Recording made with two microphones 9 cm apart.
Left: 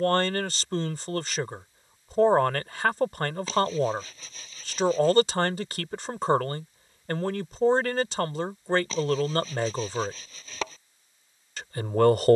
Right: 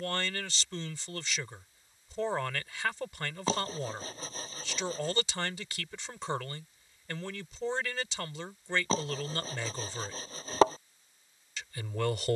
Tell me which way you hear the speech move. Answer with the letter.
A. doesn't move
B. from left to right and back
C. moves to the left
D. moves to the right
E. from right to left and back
A.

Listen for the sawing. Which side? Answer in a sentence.
You can hear the sawing on the right.